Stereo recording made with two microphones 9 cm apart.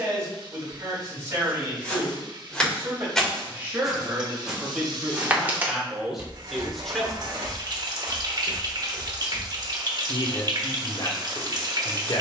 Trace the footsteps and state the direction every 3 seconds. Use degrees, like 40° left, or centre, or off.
10° left, 10° right, 20° right, 10° left.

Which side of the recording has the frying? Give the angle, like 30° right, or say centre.
50° right.